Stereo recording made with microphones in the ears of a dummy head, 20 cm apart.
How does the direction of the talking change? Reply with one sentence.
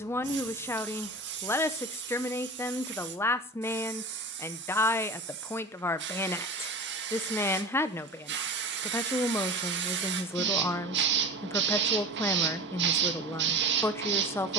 You can hear the talking stay put.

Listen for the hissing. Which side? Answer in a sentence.
In this clip you hear the hissing on the right.